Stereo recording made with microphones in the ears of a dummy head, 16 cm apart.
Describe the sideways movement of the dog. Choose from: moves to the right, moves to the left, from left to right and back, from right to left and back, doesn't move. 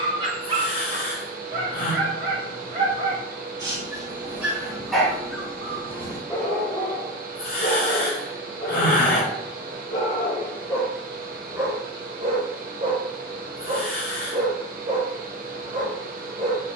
from right to left and back.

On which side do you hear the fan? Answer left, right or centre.
right.